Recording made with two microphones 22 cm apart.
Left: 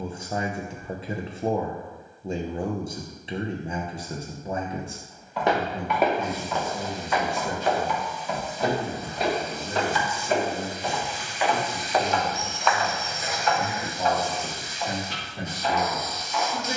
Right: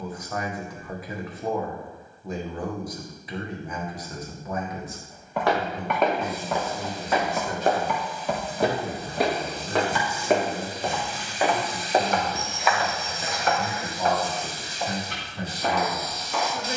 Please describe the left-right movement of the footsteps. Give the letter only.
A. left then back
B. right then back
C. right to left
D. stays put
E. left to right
B.